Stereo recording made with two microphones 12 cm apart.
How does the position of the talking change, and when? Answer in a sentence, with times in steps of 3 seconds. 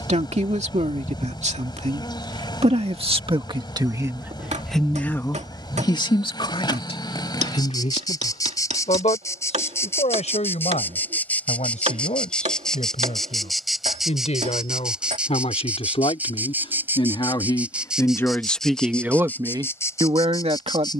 In this clip you hear the talking on the right from 0 s, in the centre from 3 s, on the left from 6 s and on the right from 18 s.